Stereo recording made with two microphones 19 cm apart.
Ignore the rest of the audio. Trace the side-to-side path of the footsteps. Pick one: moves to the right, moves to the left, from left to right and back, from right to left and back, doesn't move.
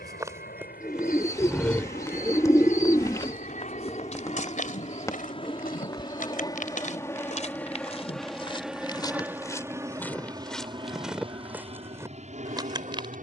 from right to left and back.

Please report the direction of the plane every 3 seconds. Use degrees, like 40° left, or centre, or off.
50° left, 40° left, 10° left, 20° right, 40° right.